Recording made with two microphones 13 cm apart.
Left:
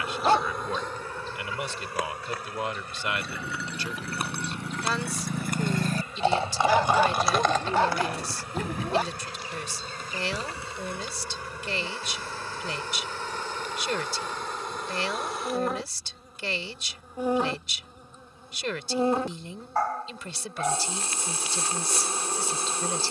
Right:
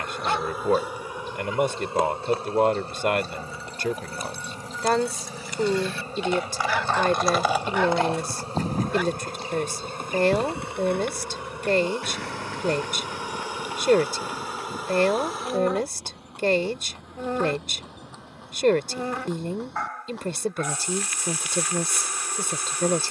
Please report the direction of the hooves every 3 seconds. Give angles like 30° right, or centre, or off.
off, 60° left, 10° right, 60° right, 70° right, 70° right, 80° right, off.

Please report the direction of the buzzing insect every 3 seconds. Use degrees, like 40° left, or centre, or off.
20° right, 40° right, 30° right, 20° right, 10° right, centre, 30° left, 30° left.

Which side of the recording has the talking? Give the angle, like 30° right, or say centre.
50° right.